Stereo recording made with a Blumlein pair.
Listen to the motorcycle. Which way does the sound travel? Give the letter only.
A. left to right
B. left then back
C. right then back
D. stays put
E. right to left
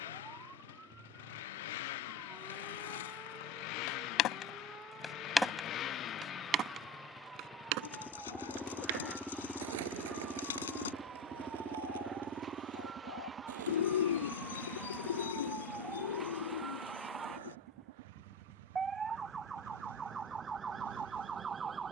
A.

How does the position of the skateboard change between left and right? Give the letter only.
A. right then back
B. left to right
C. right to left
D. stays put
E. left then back
B.